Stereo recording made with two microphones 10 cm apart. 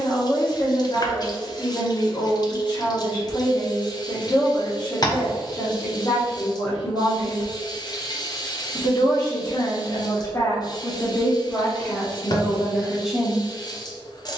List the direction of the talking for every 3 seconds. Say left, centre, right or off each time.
left, left, left, left, centre.